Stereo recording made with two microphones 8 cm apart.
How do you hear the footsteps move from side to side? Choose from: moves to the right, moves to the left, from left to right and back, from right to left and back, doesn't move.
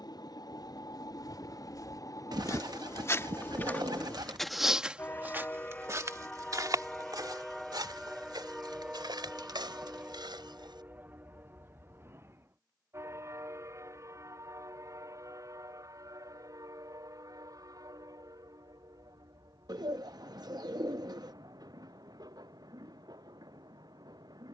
moves to the right.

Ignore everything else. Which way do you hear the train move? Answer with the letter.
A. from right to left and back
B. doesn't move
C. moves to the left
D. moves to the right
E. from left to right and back
D.